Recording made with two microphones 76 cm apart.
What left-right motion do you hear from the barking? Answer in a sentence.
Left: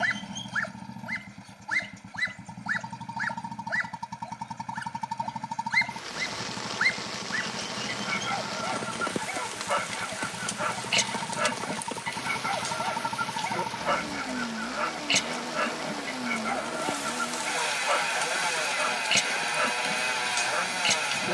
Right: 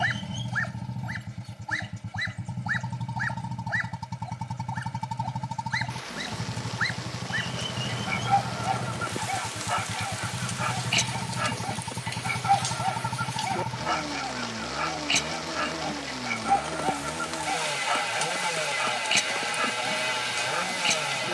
In this clip you hear the barking stay put.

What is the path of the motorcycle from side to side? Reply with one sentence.
In this clip you hear the motorcycle stay in one place.